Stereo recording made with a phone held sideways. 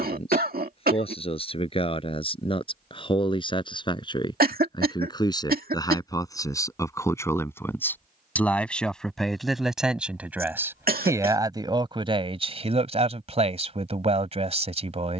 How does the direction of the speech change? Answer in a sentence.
In this clip you hear the speech travel towards the right.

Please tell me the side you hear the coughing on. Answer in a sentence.
In this clip you hear the coughing on the right.